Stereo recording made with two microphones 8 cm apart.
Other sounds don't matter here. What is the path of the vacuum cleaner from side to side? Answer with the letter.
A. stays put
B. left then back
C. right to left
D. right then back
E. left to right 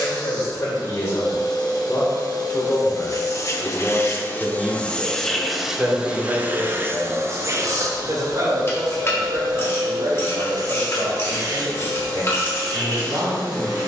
E.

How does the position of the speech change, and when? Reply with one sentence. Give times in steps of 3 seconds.
In this clip you hear the speech on the left from 0 s, in the centre from 3 s and on the right from 6 s.